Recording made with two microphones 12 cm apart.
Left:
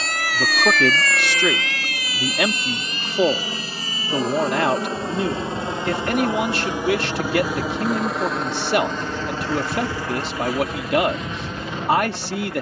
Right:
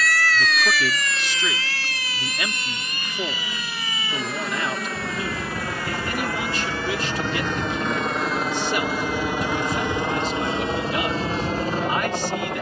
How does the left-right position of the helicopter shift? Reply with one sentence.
You can hear the helicopter go from the left side to the right.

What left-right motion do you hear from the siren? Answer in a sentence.
In this clip you hear the siren go from the left side to the right.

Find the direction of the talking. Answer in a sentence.
In this clip you hear the talking on the left.